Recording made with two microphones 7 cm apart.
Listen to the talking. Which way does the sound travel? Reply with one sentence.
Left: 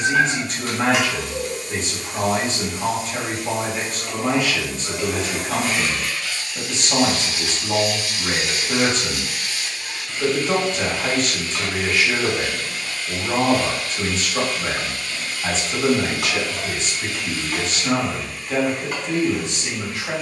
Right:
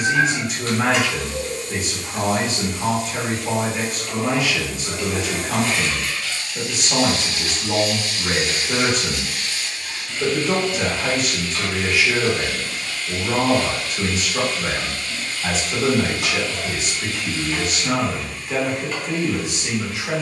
You can hear the talking stay put.